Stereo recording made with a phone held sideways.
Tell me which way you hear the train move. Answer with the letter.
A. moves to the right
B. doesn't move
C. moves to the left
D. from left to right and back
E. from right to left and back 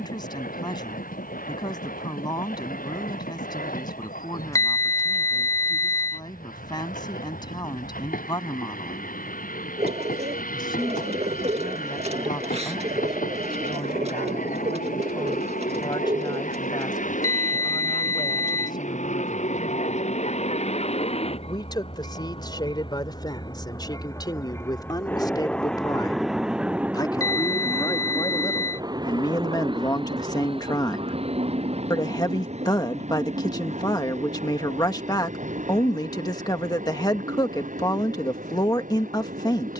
A.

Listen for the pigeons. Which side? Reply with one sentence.
In this clip you hear the pigeons on the right.